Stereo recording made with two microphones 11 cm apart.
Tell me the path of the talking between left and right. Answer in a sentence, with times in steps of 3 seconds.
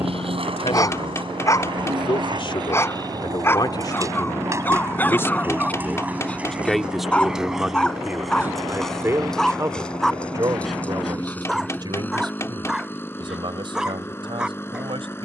You can hear the talking on the left from 0 s, in the centre from 6 s and on the right from 9 s.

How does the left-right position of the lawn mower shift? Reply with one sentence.
In this clip you hear the lawn mower move from right to left.